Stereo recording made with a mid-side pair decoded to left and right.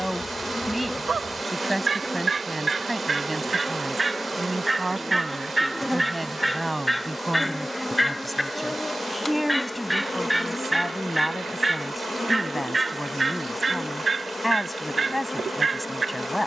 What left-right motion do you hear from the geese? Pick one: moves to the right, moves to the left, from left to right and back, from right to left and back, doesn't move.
from right to left and back.